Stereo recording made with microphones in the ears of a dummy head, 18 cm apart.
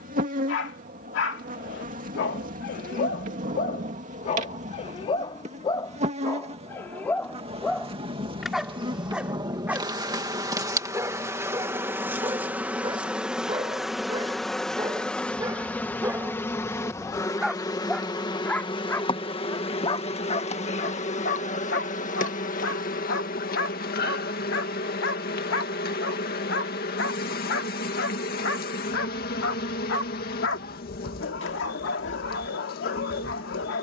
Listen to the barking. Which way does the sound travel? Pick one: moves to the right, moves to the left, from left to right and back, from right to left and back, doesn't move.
from left to right and back.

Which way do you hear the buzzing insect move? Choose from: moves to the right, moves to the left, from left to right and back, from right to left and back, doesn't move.
moves to the left.